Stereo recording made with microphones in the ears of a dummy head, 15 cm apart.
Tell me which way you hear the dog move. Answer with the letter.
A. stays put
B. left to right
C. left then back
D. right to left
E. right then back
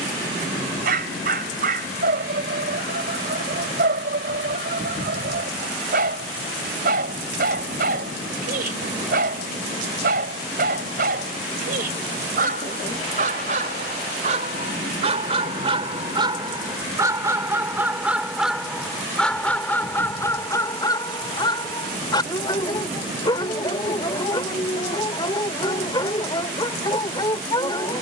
D.